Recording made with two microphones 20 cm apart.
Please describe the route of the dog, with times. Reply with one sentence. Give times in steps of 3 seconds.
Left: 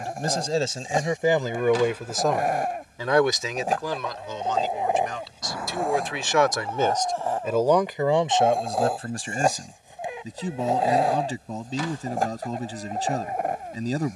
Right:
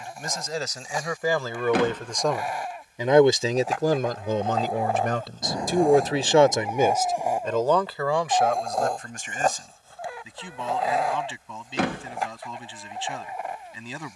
You can hear the dog on the left from 0 s, in the centre from 6 s and on the left from 9 s.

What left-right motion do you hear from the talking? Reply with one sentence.
In this clip you hear the talking move from left to right and back again.